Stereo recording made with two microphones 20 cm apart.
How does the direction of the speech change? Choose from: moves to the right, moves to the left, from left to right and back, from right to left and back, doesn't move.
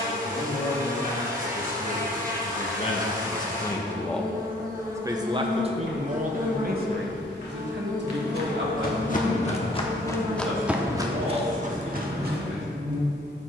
moves to the right.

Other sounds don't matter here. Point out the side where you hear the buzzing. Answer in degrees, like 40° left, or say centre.
40° right.